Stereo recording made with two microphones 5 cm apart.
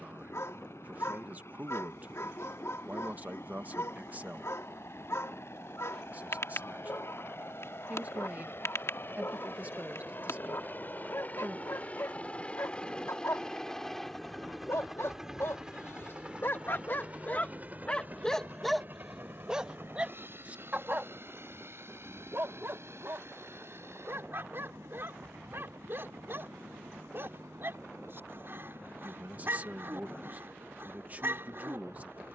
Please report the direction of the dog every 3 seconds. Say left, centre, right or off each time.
left, left, left, left, left, left, centre, right, right, right, right.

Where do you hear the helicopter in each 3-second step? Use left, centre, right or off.
left, left, left, left, centre, right, right, right, right, right, right.